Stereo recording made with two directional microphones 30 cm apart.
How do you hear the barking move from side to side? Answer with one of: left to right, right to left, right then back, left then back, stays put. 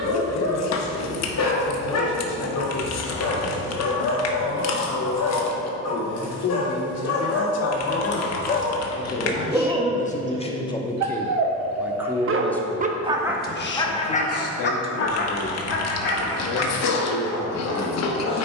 right then back.